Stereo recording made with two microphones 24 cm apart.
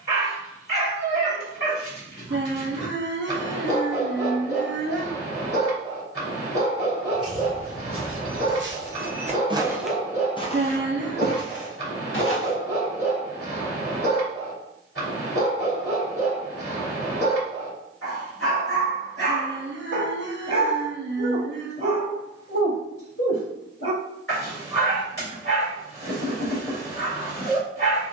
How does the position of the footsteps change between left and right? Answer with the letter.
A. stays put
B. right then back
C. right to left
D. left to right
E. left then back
C.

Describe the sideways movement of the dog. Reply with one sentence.
In this clip you hear the dog stay put.